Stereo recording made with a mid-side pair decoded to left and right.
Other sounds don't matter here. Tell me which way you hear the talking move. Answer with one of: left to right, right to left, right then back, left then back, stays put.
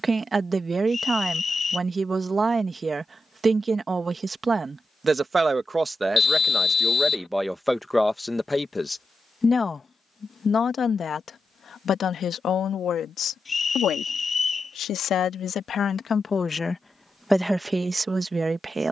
left then back.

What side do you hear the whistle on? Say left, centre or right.
left.